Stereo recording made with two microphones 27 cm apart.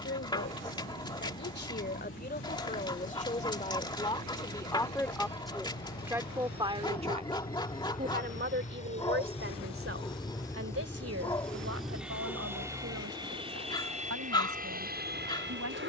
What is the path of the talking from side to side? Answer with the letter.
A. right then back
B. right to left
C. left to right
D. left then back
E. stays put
C.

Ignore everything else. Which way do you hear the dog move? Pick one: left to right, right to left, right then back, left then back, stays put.
stays put.